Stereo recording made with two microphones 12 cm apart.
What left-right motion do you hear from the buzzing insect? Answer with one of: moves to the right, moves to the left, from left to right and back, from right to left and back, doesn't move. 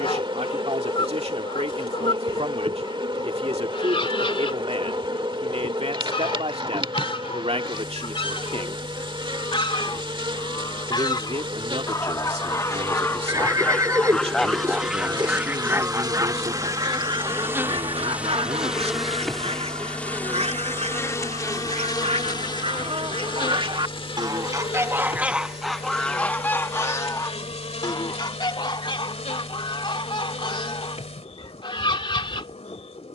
moves to the left.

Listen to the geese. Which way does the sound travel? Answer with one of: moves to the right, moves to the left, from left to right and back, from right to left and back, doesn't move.
from left to right and back.